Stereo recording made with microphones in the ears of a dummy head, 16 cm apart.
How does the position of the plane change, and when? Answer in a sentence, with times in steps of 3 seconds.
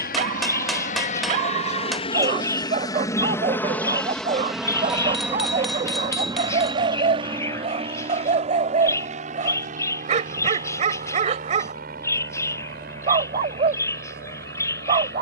You can hear the plane on the left from 0 s, in the centre from 3 s and on the right from 6 s.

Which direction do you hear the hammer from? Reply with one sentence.
In this clip you hear the hammer in the centre.